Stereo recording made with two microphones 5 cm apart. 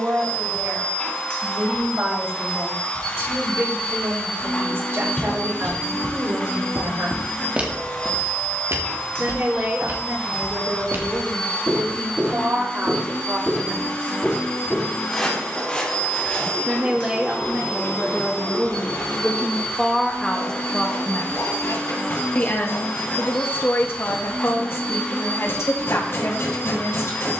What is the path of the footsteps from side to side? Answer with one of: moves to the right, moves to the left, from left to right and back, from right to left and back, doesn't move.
from left to right and back.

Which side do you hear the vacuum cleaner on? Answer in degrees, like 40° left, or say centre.
20° left.